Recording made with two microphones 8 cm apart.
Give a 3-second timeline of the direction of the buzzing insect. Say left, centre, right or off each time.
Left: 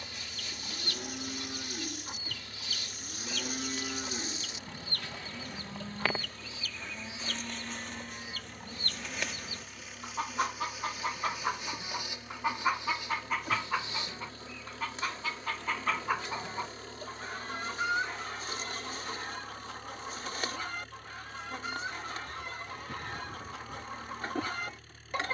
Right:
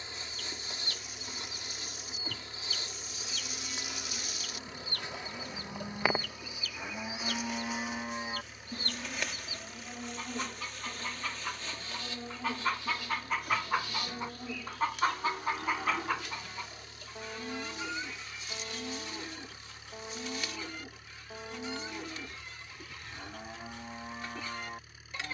right, right, centre, centre, left, left, left, left, left.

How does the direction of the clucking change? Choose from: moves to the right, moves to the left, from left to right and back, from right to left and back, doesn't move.
from left to right and back.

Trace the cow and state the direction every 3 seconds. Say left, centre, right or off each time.
left, left, right, right, right, right, right, right, right.